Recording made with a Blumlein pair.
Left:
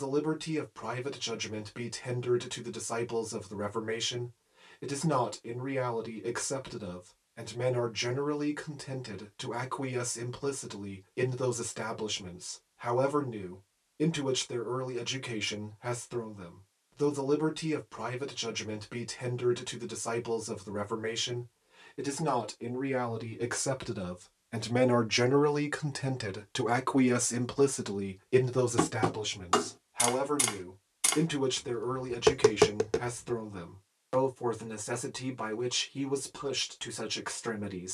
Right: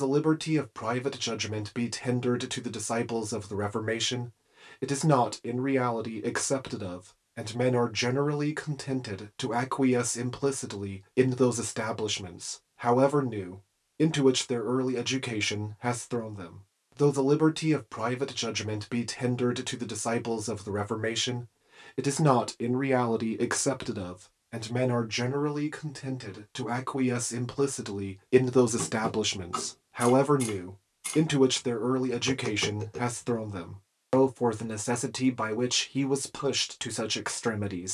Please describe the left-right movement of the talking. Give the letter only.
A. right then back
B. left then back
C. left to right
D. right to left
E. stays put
B.